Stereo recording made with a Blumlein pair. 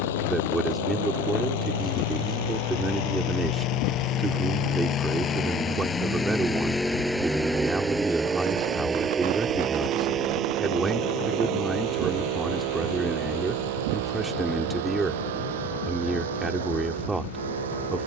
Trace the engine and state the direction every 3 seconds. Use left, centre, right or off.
left, left, centre, right, right, right.